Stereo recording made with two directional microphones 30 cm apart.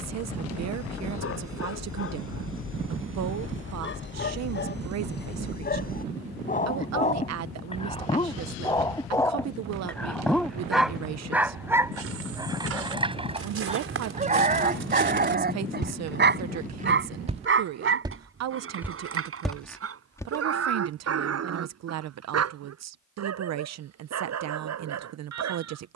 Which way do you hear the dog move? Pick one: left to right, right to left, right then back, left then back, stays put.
left to right.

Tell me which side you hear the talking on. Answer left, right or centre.
right.